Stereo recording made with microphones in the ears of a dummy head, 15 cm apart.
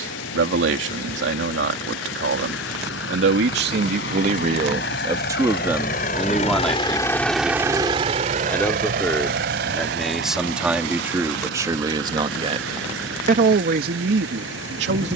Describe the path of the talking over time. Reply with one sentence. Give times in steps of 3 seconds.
You can hear the talking on the right from 0 s, in the centre from 6 s and on the right from 12 s.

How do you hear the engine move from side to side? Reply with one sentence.
In this clip you hear the engine travel towards the right.